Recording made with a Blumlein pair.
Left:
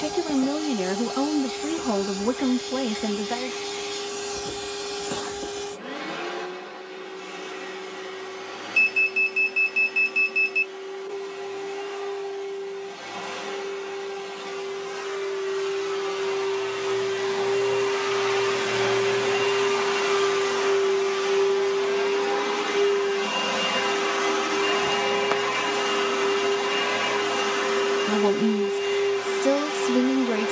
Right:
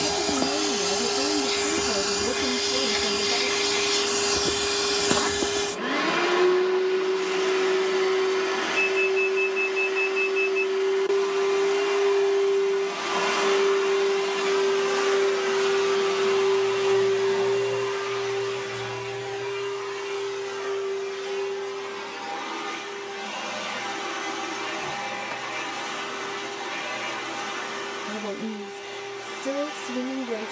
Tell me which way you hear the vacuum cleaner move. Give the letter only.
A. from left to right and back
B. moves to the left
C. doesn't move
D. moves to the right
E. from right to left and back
B.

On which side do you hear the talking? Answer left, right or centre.
left.